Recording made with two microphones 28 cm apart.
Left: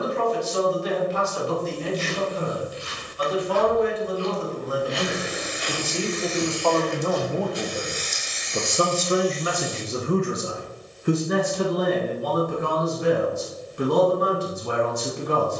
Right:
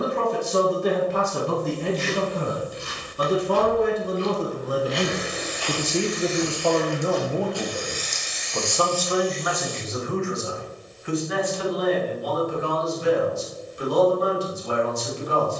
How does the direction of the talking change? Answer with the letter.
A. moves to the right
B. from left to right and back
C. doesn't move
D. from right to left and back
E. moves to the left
E.